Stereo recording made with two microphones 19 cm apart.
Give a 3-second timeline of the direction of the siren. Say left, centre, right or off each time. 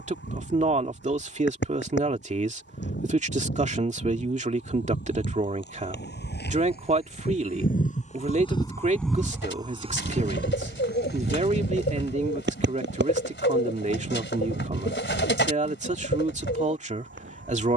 left, left, left, right, right, right.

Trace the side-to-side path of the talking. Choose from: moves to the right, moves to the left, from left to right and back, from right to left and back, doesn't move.
doesn't move.